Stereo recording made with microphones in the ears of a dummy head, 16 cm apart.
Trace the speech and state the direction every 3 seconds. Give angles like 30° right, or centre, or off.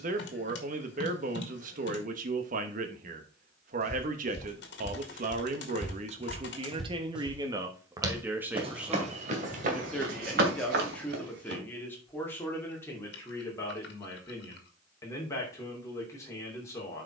50° right, 50° right, 20° right, centre, 10° left, 20° left.